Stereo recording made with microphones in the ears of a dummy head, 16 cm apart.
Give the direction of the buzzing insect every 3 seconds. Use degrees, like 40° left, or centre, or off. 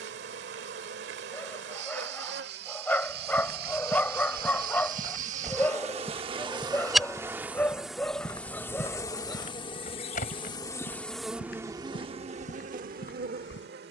70° right, 50° right, 10° right, 10° left, 50° right.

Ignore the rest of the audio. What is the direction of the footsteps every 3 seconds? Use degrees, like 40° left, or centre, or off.
off, 40° right, 10° left, 50° left, 70° left.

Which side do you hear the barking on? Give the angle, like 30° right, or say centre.
10° left.